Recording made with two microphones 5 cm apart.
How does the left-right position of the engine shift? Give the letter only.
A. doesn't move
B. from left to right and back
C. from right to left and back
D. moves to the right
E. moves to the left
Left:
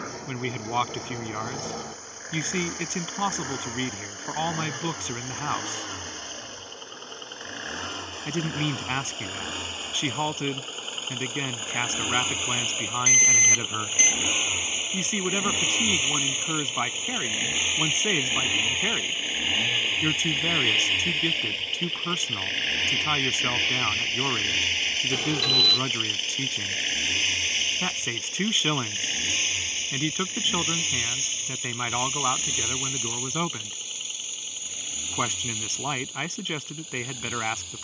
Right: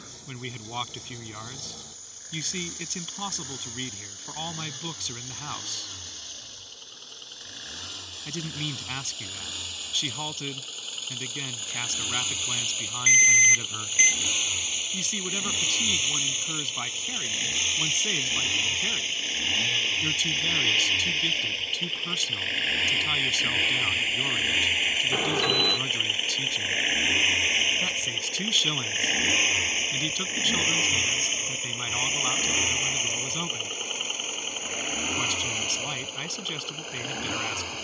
D.